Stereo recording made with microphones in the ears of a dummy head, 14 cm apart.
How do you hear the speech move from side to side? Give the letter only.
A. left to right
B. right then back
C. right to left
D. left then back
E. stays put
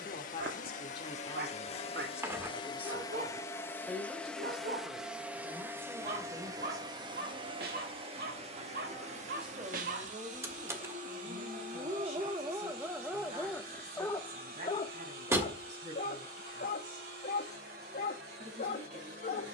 A.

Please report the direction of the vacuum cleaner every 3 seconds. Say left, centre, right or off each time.
left, centre, right, right, right, right, right.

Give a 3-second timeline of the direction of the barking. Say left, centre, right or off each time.
right, right, right, right, centre, left, left.